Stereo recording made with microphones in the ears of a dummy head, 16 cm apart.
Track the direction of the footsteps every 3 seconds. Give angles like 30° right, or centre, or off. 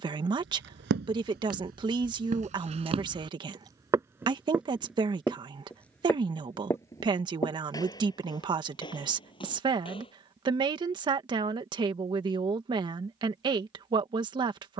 50° right, 10° right, 20° left, 30° left, off.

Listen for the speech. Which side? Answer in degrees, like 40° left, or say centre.
30° right.